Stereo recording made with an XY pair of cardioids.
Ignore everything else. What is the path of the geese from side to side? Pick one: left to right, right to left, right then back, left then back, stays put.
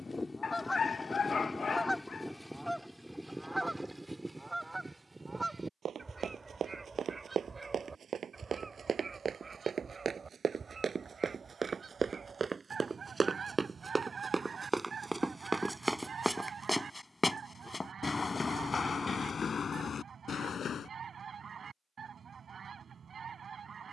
left to right.